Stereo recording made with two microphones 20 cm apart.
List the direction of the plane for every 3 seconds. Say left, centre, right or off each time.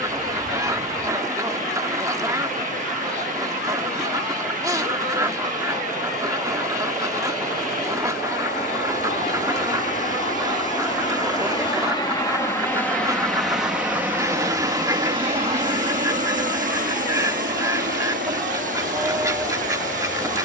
left, left, left, left, centre, right, right.